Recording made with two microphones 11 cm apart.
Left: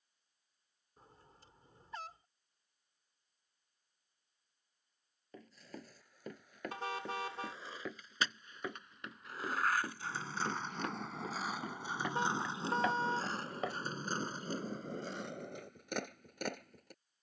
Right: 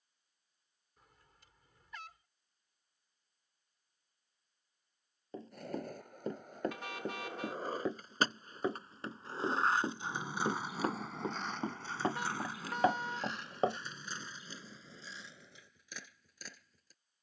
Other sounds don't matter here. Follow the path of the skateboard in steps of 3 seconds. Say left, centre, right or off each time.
off, right, right, centre, left, left.